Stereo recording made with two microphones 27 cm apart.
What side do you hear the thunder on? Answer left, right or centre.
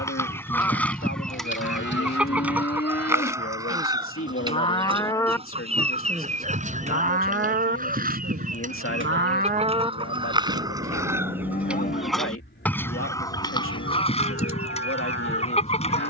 right.